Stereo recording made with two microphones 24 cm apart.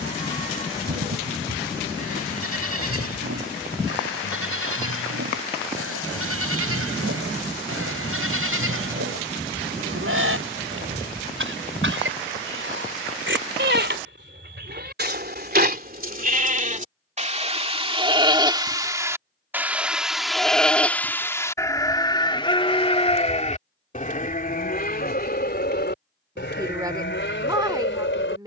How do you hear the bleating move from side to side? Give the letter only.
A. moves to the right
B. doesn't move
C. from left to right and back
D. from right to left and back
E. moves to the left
E.